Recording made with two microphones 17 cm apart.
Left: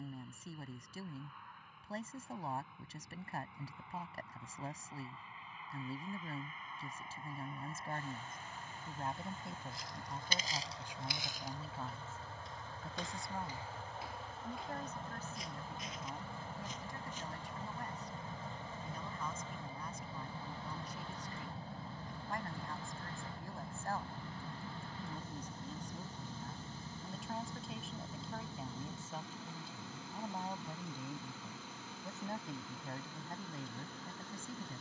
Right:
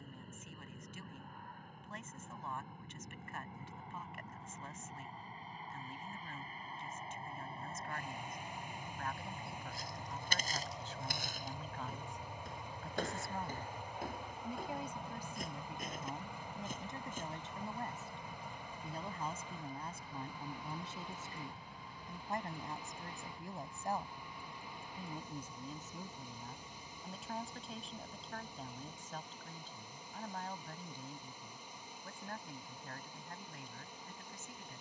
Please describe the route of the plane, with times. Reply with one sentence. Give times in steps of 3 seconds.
In this clip you hear the plane on the right from 0 s, in the centre from 12 s and on the left from 18 s.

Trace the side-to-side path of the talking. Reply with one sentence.
You can hear the talking go right and come back.